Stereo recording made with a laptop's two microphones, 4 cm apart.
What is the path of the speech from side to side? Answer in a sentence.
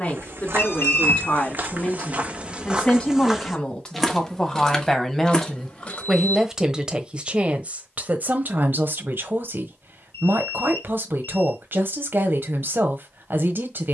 In this clip you hear the speech move from left to right.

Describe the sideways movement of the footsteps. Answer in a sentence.
You can hear the footsteps move to the left.